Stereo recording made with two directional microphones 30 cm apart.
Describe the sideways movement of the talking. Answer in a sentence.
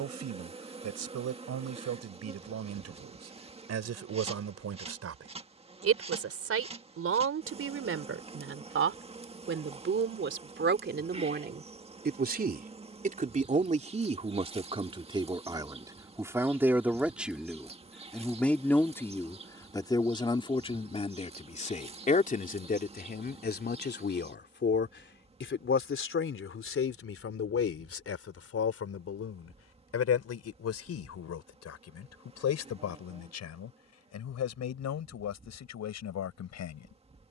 In this clip you hear the talking travel towards the left.